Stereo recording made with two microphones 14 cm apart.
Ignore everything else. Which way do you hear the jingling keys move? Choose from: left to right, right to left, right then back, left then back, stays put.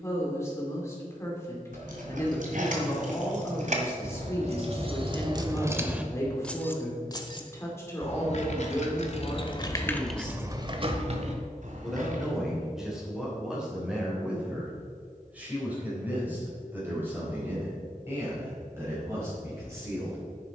left then back.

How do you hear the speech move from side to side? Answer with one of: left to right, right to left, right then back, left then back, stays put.
left to right.